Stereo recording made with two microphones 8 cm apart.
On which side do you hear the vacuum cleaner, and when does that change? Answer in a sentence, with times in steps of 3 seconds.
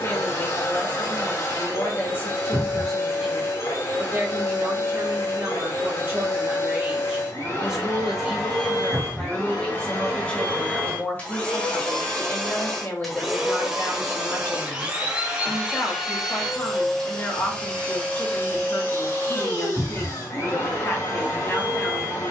You can hear the vacuum cleaner on the left from 0 s, in the centre from 12 s and on the left from 18 s.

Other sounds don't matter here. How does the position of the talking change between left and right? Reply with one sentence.
In this clip you hear the talking move from left to right and back again.